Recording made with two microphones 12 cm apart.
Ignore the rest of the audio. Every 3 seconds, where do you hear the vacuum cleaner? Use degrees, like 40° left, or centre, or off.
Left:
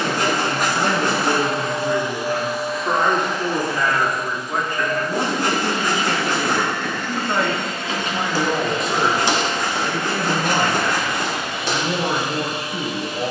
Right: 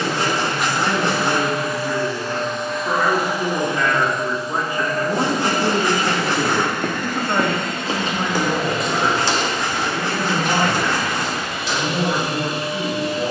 30° left, 30° right, 50° right, 60° right, 70° right.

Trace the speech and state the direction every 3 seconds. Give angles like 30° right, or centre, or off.
40° left, 10° right, centre, 40° left, 40° left.